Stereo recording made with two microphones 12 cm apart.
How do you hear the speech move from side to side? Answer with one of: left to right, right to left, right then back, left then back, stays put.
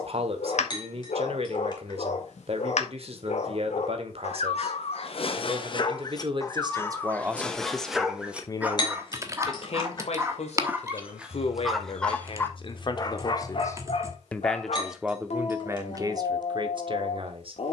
left then back.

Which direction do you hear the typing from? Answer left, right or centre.
right.